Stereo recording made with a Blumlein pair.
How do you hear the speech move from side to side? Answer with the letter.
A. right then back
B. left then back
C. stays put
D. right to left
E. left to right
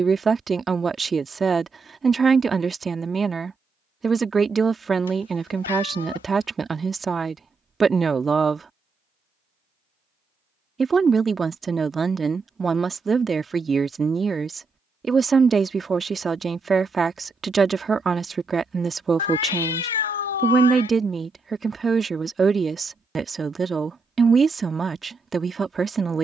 C.